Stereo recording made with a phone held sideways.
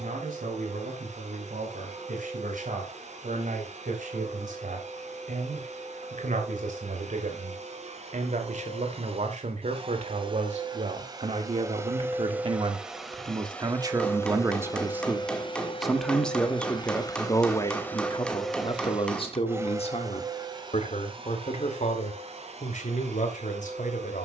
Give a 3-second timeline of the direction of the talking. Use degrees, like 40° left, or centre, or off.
70° right, 70° right, 70° right, 50° right, 30° right, 10° left, 40° left, 60° left.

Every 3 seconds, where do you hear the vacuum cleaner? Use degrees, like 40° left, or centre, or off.
60° right, 60° right, 50° right, 30° right, 10° left, 30° left, 20° right, 50° right.